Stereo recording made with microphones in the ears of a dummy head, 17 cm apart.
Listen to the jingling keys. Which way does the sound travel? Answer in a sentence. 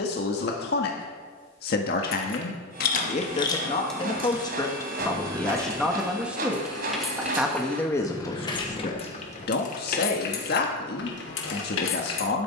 In this clip you hear the jingling keys move from left to right and back again.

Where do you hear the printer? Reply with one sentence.
You can hear the printer on the right.